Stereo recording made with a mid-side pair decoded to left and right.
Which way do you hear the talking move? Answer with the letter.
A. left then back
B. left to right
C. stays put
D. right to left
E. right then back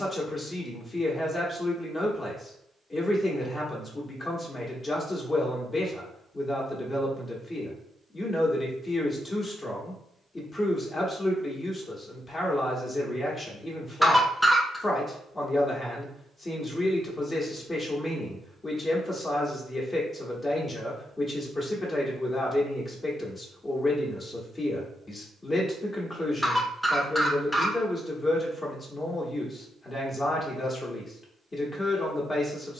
C.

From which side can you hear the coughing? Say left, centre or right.
centre.